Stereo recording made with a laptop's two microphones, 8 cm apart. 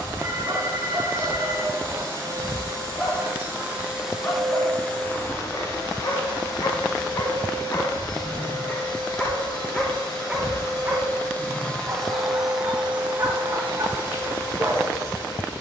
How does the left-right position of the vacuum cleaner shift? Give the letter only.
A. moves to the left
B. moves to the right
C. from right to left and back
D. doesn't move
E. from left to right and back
C.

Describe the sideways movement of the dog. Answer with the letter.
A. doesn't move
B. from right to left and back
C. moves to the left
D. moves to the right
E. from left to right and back
B.